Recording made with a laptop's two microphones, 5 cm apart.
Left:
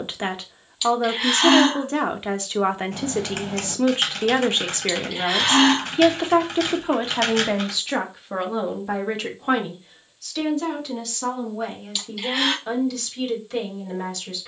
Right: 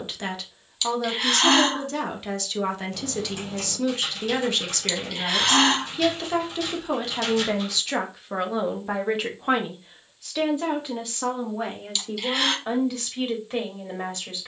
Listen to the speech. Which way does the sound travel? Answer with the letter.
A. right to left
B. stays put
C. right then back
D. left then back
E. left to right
E.